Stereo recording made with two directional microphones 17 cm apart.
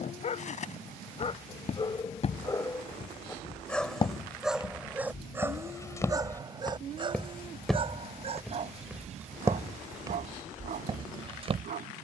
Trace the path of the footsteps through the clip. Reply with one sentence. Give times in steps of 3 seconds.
In this clip you hear the footsteps on the left from 0 s, in the centre from 6 s and on the right from 9 s.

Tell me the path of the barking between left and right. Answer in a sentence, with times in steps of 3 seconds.
You can hear the barking on the left from 0 s, in the centre from 3 s and on the right from 6 s.